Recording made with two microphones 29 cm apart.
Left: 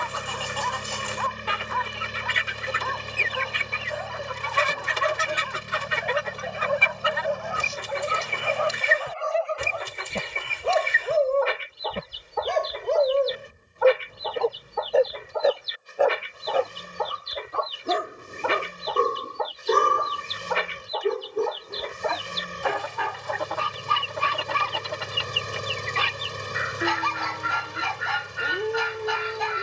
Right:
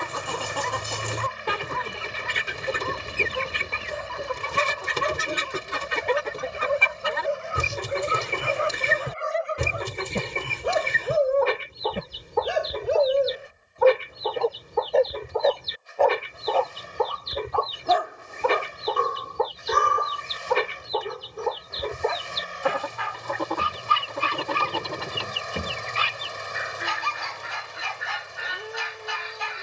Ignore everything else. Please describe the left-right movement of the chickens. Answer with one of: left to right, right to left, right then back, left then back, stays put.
stays put.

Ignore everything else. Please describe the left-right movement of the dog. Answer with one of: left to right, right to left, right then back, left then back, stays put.
right to left.